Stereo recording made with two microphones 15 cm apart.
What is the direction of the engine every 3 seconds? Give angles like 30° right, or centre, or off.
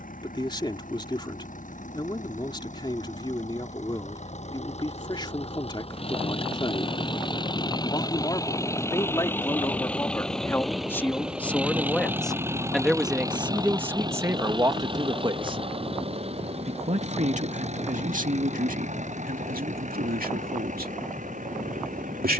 60° left, 50° left, 30° left, centre, 20° right, 40° right, 50° right, 60° right.